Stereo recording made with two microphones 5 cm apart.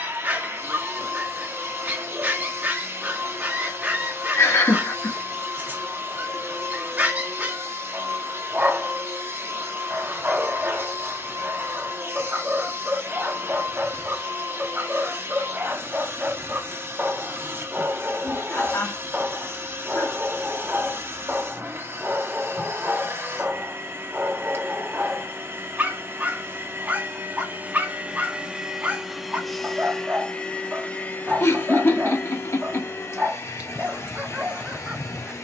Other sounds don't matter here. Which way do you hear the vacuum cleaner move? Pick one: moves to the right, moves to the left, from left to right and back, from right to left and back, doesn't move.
moves to the left.